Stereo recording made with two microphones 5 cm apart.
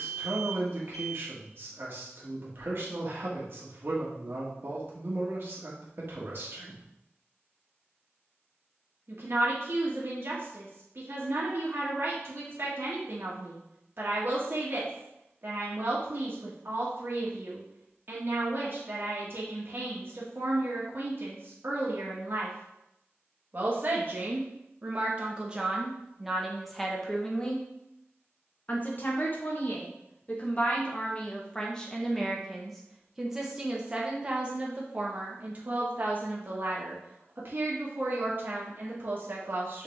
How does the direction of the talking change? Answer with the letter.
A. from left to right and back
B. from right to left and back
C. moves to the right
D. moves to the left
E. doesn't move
B.